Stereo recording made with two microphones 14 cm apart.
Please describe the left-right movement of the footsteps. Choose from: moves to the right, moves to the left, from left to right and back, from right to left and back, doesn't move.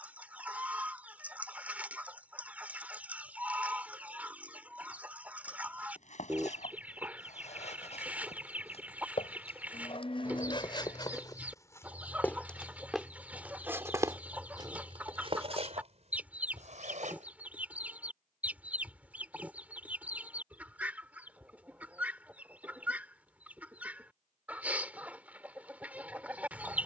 moves to the right.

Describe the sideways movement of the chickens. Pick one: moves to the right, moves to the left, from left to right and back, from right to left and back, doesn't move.
doesn't move.